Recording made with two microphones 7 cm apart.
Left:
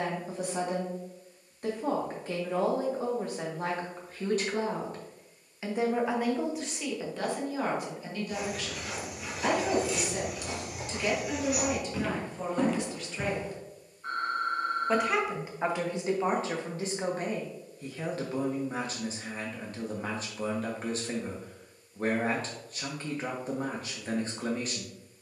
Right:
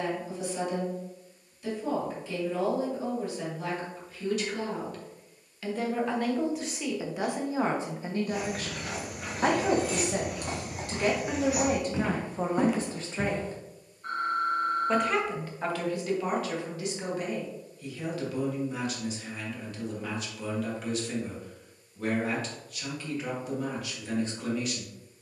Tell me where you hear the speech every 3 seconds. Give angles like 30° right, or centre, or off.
50° left, 40° left, 20° right, 50° right, 30° right, 30° left, 40° left, 40° left, 40° left.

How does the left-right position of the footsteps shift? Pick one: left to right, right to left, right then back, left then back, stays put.
right to left.